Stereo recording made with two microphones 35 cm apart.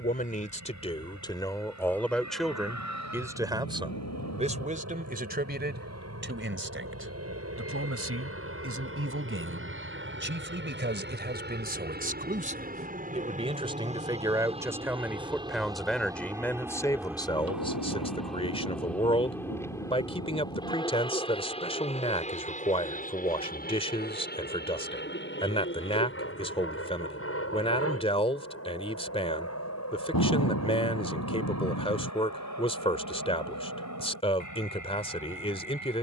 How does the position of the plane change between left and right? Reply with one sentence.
You can hear the plane travel towards the left.